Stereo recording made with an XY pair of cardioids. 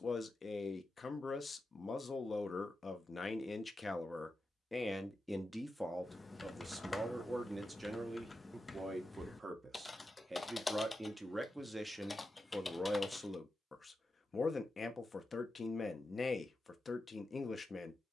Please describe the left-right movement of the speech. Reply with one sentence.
You can hear the speech move from left to right and back again.